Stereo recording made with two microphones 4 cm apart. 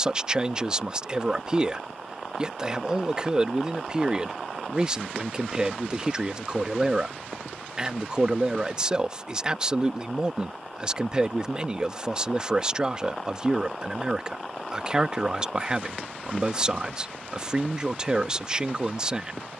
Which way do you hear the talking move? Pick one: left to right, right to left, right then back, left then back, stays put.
stays put.